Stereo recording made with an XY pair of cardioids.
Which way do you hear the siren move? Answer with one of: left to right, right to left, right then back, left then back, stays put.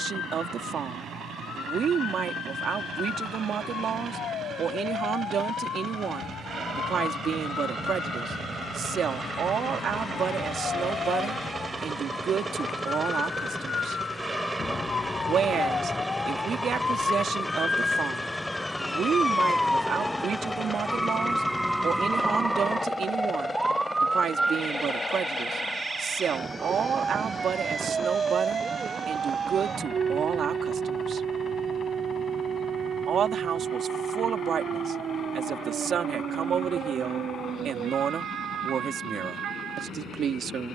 left to right.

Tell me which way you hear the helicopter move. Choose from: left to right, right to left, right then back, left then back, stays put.
right to left.